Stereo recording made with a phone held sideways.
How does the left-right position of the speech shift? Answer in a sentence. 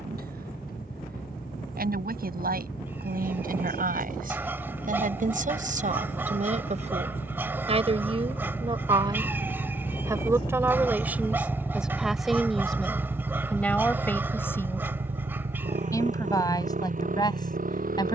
You can hear the speech move from right to left.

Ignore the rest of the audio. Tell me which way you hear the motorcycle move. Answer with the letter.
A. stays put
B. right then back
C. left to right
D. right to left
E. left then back
C.